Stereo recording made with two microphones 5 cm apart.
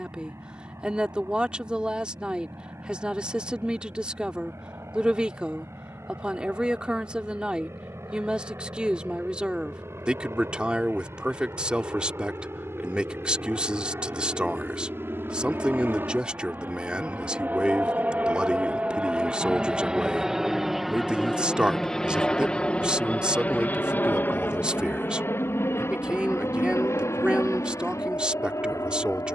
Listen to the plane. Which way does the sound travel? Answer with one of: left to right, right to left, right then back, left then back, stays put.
right to left.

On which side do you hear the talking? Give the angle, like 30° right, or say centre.
20° right.